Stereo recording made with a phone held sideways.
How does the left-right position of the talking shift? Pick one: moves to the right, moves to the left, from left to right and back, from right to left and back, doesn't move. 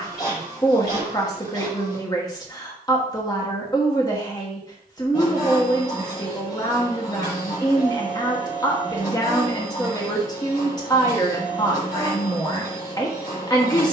doesn't move.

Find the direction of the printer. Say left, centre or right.
left.